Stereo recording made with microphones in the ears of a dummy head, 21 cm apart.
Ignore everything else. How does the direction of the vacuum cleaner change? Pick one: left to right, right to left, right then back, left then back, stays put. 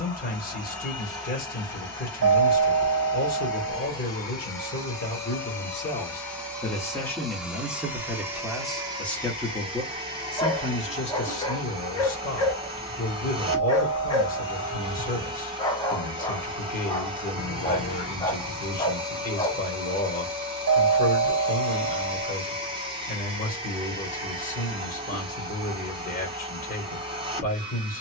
left to right.